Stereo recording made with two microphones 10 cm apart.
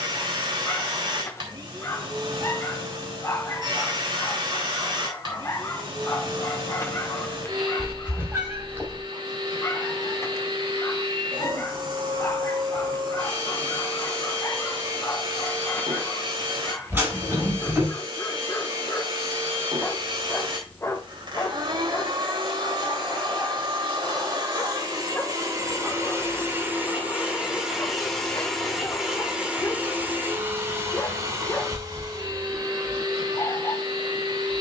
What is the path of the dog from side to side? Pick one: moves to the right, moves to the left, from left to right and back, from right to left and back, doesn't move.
doesn't move.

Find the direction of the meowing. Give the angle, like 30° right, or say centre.
20° right.